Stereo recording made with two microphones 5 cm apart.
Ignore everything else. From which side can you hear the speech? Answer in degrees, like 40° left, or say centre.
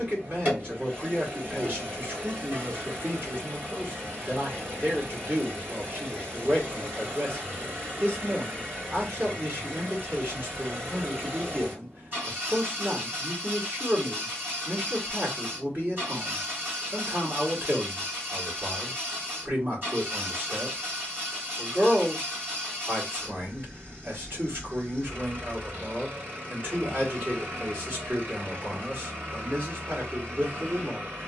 50° right.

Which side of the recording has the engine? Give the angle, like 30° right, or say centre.
50° right.